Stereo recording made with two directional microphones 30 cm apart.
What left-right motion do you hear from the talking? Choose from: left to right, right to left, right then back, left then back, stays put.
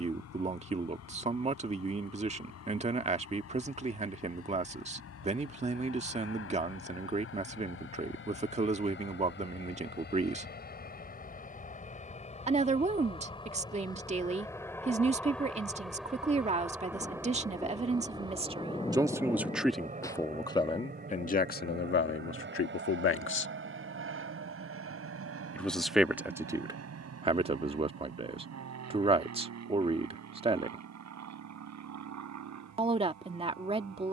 left then back.